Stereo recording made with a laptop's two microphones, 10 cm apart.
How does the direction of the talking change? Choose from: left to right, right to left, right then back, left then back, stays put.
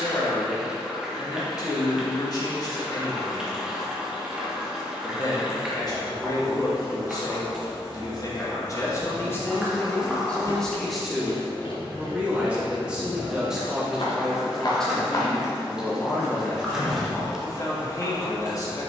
right then back.